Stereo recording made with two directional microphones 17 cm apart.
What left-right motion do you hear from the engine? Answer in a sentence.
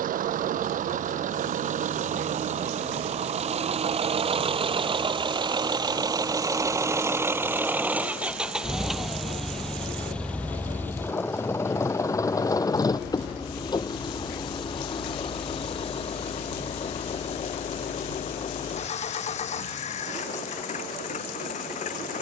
You can hear the engine move from right to left.